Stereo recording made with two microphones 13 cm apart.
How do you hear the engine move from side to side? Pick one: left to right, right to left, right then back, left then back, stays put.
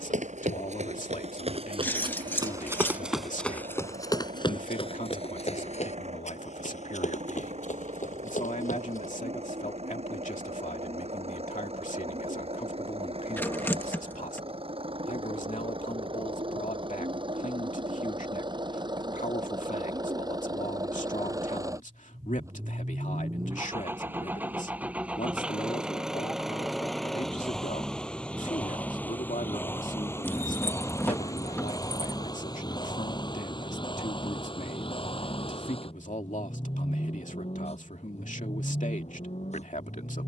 right to left.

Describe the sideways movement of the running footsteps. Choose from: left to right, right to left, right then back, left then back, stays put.
right to left.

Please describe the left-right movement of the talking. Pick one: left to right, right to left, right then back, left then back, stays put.
stays put.